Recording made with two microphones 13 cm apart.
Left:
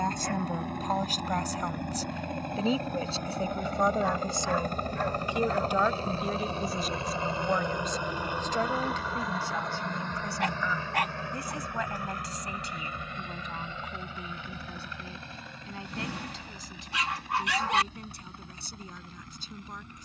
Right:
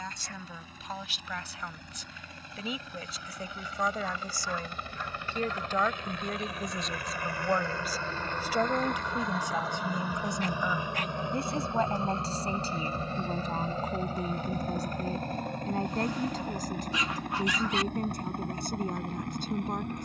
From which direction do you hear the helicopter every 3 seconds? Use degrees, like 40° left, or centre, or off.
60° left, 50° left, 20° left, 10° right, 40° right, 50° right, 60° right.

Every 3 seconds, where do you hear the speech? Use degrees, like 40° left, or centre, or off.
40° left, 20° left, centre, 20° right, 40° right, 50° right, 50° right.